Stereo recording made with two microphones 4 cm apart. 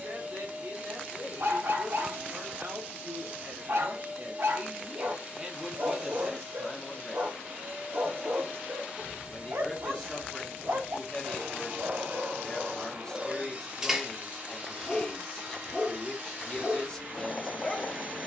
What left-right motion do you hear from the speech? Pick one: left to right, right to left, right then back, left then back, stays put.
right to left.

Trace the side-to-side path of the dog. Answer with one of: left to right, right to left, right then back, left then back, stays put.
right to left.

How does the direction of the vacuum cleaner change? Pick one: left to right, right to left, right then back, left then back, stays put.
stays put.